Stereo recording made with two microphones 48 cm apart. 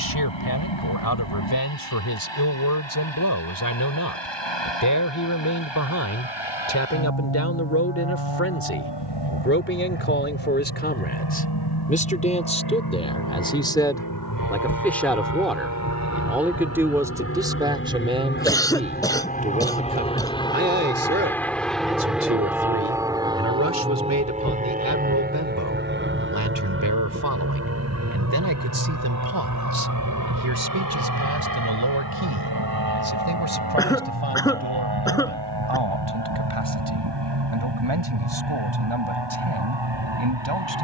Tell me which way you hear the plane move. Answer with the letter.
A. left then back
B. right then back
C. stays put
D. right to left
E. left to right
E.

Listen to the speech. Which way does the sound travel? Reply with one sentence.
You can hear the speech travel towards the right.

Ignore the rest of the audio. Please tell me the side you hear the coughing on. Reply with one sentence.
You can hear the coughing in the centre.